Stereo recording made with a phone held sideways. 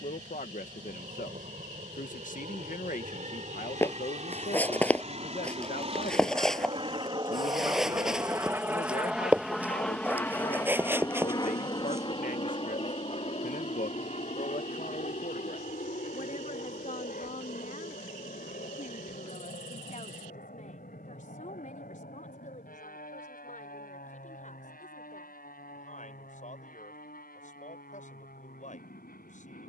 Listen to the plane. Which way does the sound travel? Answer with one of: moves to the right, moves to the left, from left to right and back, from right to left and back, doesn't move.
moves to the left.